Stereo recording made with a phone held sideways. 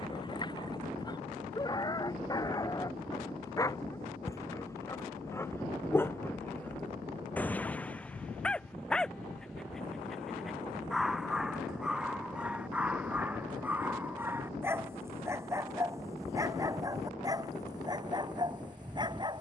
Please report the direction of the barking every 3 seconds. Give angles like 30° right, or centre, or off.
30° left, 20° left, 10° left, centre, 10° right, 20° right, 30° right.